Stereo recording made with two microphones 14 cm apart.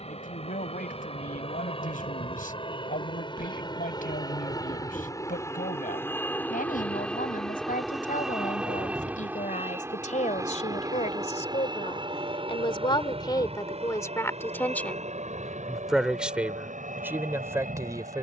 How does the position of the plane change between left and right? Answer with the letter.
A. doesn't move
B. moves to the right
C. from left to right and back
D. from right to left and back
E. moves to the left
B.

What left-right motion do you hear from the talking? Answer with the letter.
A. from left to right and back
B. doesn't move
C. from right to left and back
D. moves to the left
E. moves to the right
E.